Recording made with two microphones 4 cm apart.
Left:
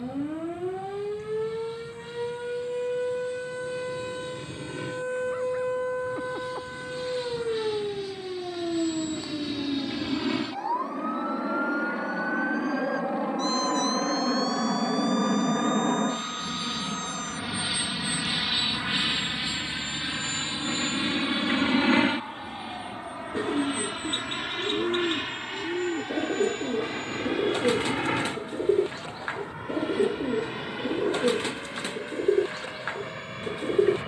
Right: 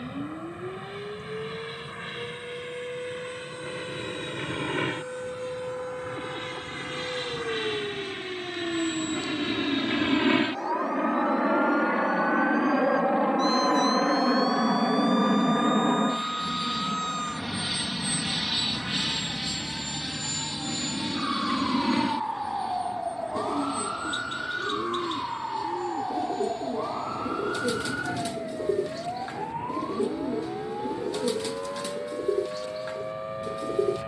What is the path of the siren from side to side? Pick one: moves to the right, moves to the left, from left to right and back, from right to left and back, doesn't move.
moves to the right.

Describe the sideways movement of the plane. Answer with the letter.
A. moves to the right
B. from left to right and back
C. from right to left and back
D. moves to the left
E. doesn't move
D.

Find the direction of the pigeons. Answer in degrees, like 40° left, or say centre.
40° left.